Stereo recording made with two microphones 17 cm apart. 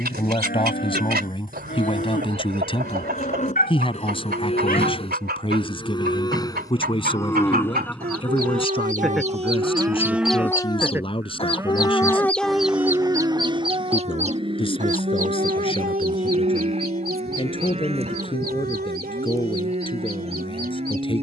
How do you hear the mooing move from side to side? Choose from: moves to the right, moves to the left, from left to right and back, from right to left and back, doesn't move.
moves to the right.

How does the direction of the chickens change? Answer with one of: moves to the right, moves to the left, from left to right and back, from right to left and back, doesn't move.
from right to left and back.